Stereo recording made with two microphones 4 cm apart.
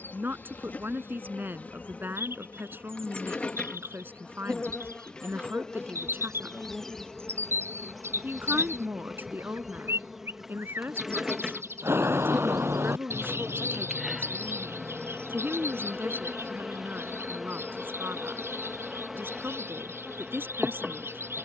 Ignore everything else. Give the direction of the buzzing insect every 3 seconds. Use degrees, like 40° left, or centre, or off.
40° left, 30° left, 10° left, 10° right, 10° right, 10° right, 10° right.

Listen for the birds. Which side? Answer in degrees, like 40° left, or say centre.
80° right.